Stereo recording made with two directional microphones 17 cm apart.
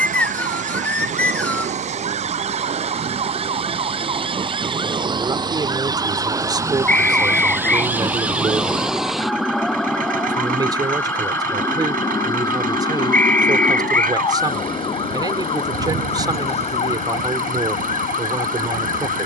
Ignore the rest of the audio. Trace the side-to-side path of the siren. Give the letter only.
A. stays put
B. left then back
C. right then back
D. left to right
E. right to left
E.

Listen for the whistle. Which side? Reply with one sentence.
You can hear the whistle in the centre.